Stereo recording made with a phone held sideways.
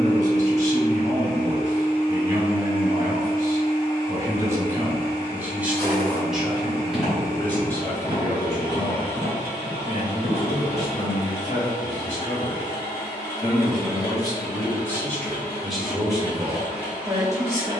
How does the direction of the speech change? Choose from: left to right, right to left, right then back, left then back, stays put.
left then back.